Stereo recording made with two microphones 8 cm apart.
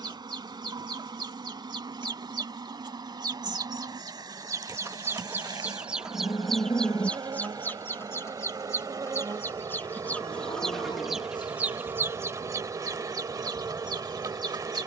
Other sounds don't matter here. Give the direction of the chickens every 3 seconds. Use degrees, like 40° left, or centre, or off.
70° right, 40° right, 20° left, 10° left, 50° right.